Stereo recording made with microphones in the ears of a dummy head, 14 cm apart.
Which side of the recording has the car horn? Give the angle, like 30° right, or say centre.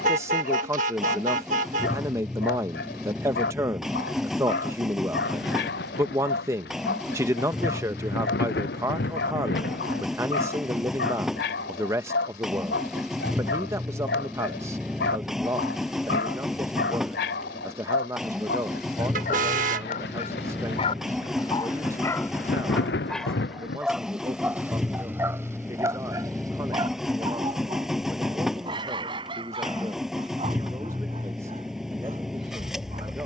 50° right.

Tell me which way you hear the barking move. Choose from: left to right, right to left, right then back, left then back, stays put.
left to right.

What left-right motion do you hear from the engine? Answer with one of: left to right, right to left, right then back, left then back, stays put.
stays put.